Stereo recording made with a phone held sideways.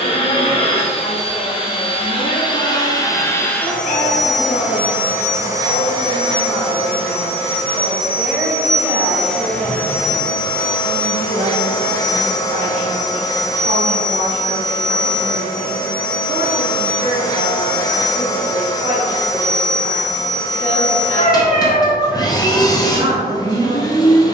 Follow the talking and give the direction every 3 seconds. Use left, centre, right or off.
left, left, centre, right, right, right, right, right.